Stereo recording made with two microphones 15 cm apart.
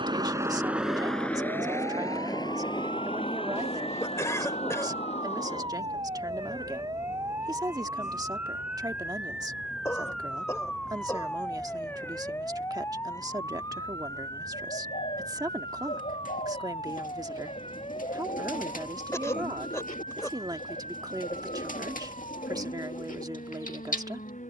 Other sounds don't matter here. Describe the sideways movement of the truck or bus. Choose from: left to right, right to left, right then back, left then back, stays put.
right to left.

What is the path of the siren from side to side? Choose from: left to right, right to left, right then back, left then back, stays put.
right to left.